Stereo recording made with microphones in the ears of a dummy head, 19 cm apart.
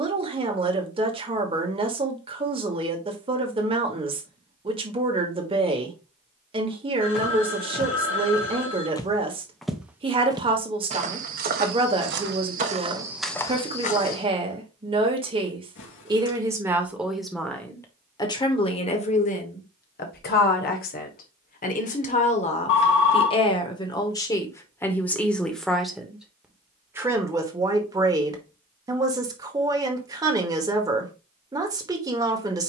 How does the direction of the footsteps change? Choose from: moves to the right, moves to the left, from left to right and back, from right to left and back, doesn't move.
from left to right and back.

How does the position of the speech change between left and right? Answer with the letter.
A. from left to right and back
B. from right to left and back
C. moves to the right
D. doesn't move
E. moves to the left
B.